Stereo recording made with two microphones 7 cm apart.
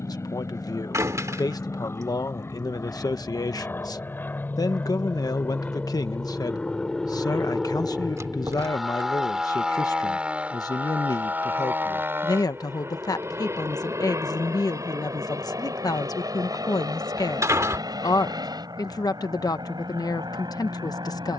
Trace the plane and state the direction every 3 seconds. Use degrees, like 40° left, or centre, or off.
40° left, 30° left, 10° left, 20° right, 40° right, 50° right, 60° right.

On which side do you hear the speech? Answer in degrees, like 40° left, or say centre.
60° left.